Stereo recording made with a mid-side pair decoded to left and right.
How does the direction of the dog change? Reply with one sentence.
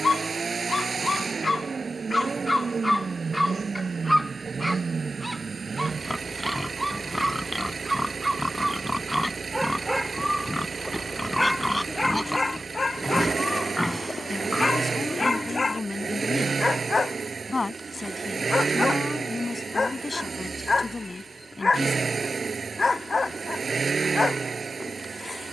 You can hear the dog move from left to right and back again.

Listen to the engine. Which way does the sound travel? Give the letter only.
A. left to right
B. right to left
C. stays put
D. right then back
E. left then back
C.